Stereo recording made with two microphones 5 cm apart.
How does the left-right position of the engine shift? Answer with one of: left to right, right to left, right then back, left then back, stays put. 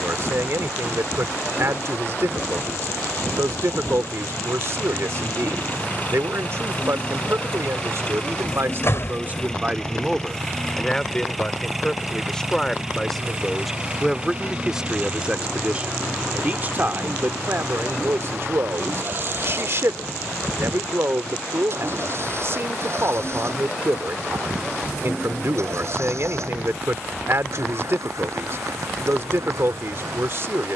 left to right.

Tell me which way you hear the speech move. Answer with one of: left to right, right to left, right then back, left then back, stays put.
left then back.